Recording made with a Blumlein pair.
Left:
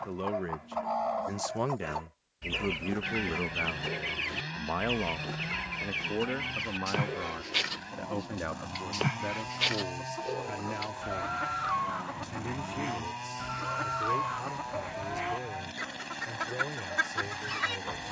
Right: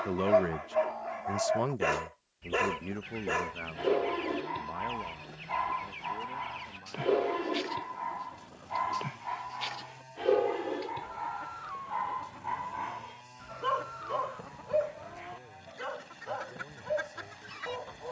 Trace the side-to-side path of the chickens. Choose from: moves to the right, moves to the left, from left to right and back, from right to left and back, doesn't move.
doesn't move.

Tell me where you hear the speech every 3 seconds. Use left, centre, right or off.
centre, left, left, left, left, left.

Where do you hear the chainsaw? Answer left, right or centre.
left.